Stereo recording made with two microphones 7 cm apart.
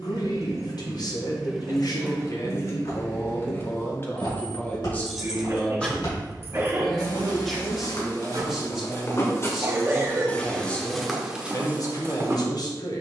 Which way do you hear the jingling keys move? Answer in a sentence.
In this clip you hear the jingling keys go left and come back.